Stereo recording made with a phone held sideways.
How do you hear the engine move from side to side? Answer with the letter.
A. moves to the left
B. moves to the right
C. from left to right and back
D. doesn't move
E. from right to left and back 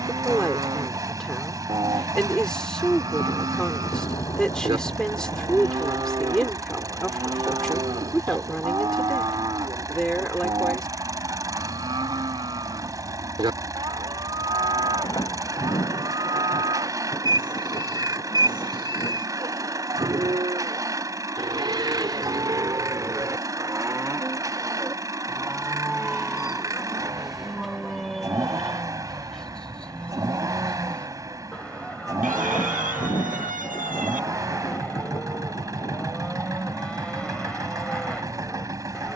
D.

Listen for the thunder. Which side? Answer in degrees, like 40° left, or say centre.
30° left.